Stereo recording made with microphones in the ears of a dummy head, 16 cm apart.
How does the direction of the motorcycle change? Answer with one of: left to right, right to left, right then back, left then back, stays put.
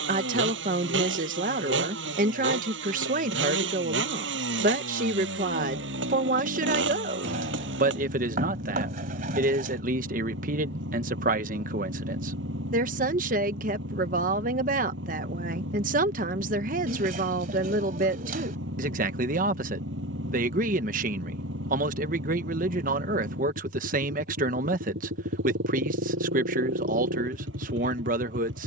stays put.